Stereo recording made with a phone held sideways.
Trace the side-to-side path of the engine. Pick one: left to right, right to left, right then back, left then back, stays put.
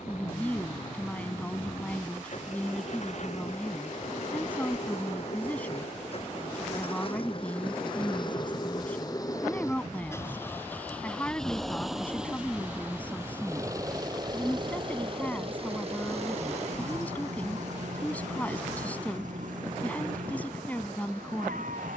left to right.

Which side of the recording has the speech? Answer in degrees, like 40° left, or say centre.
10° left.